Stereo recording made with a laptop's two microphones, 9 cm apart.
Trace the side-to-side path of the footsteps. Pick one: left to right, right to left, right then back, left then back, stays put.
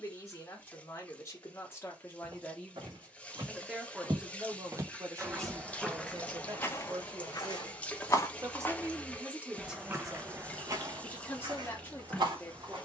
left then back.